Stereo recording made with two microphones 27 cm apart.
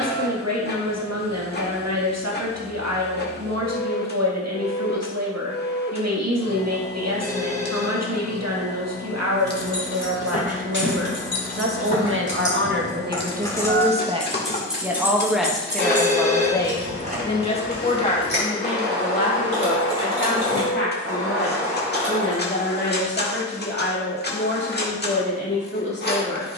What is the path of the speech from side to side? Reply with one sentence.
In this clip you hear the speech move to the left.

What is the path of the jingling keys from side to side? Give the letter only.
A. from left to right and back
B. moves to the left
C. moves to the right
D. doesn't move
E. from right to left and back
C.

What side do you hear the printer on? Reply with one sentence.
In this clip you hear the printer on the left.